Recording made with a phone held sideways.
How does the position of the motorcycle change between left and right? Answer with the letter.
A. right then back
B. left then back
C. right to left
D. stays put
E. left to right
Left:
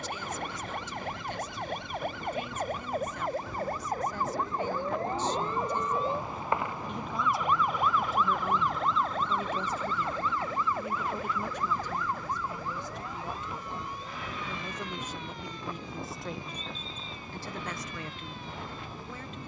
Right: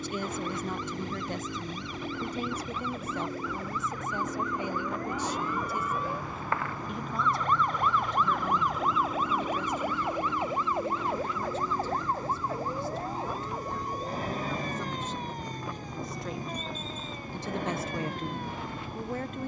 D.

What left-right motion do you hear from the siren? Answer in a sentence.
You can hear the siren travel towards the right.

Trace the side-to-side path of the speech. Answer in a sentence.
In this clip you hear the speech go left and come back.